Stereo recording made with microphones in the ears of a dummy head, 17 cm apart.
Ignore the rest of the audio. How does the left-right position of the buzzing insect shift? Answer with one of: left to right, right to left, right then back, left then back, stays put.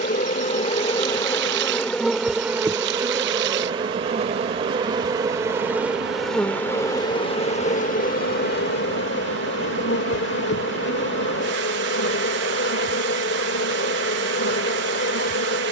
right then back.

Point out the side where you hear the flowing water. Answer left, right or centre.
right.